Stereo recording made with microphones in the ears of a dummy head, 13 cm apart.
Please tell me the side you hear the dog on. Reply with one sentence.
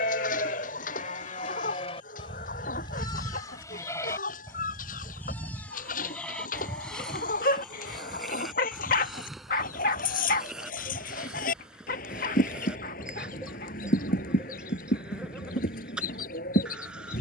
You can hear the dog on the left.